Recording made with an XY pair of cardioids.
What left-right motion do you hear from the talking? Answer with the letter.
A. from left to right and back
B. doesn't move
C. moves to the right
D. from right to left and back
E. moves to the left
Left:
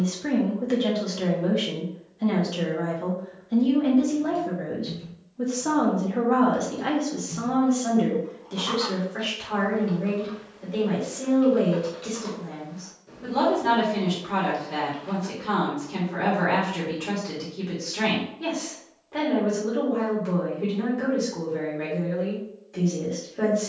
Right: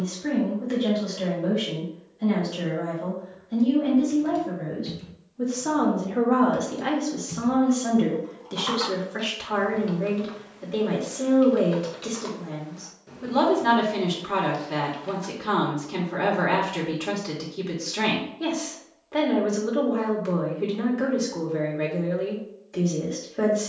C.